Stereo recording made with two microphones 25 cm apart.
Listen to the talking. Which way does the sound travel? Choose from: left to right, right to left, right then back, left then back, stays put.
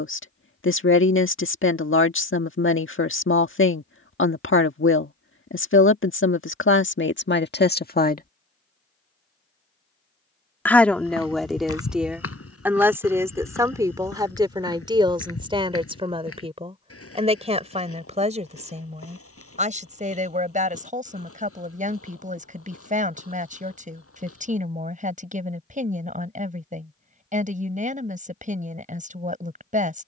left to right.